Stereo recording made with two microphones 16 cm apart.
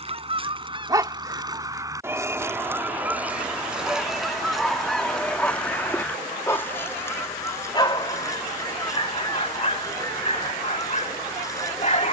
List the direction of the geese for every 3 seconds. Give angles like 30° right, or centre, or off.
30° right, centre, 20° left, 20° left.